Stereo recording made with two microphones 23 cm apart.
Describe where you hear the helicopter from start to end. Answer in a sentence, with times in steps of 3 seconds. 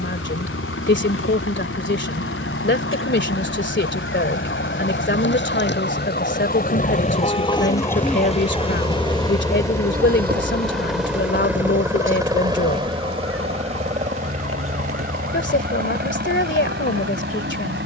You can hear the helicopter on the left from 0 s, in the centre from 9 s and on the right from 12 s.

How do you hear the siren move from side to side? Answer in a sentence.
You can hear the siren move from left to right.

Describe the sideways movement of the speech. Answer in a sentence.
You can hear the speech stay in one place.